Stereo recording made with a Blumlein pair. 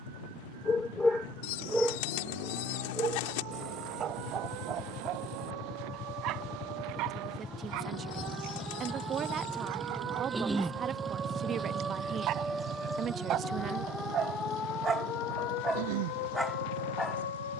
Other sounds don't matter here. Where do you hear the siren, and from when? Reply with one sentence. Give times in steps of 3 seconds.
In this clip you hear the siren on the right from 0 s, in the centre from 12 s and on the left from 15 s.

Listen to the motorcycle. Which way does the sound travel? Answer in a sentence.
You can hear the motorcycle travel towards the right.